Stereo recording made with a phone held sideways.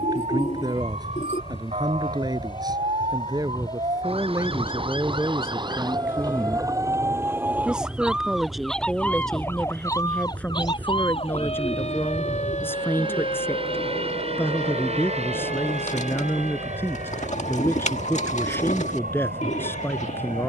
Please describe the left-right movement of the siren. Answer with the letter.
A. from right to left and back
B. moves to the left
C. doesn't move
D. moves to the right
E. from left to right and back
B.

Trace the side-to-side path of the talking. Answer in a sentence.
You can hear the talking move to the left.